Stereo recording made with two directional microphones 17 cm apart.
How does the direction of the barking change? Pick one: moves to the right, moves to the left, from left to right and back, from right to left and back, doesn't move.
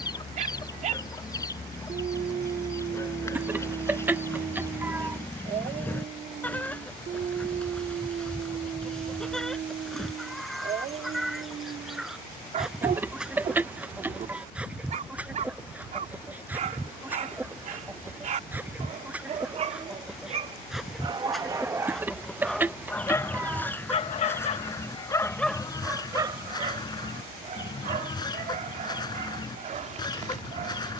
from right to left and back.